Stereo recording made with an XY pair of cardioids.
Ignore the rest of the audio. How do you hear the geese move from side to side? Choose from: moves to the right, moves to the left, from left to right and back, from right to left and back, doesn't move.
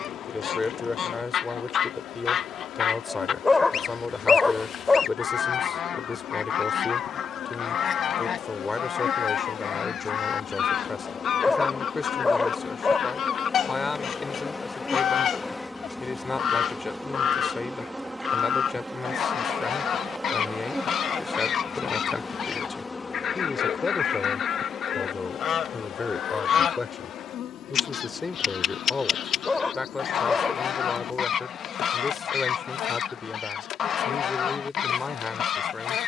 doesn't move.